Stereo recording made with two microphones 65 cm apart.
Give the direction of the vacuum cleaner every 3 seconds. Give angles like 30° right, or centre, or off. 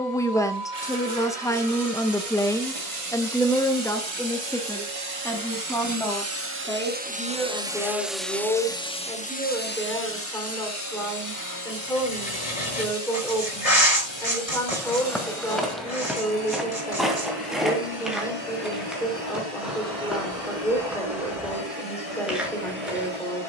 60° right, 40° right, 10° right, 20° left, 40° left, 50° left, 50° left, 60° left.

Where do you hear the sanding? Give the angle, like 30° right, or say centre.
60° left.